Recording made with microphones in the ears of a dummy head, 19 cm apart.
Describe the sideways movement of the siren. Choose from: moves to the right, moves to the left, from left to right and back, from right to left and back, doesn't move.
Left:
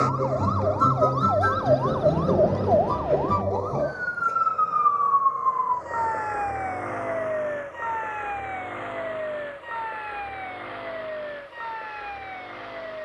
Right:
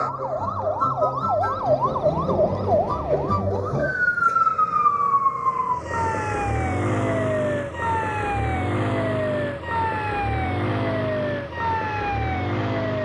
moves to the right.